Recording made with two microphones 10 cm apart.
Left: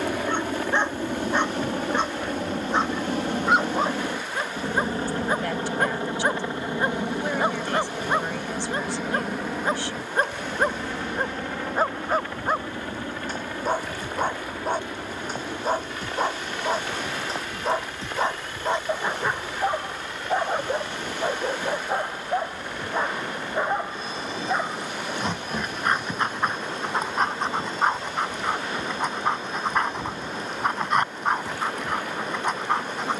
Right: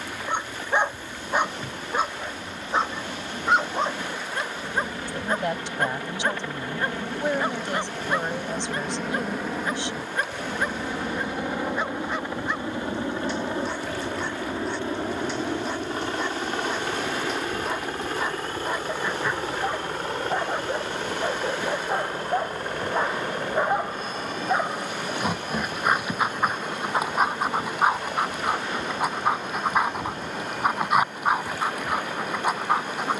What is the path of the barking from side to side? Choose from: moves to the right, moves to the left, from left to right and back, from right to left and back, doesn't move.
from right to left and back.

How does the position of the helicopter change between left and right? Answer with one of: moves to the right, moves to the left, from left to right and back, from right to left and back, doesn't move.
moves to the right.